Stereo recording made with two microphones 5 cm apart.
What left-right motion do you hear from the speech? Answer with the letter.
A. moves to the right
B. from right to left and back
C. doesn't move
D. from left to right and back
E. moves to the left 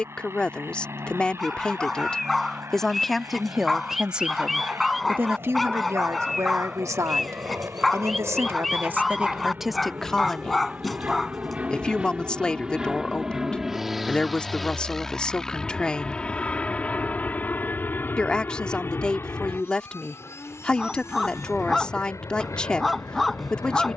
D.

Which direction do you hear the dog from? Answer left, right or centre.
centre.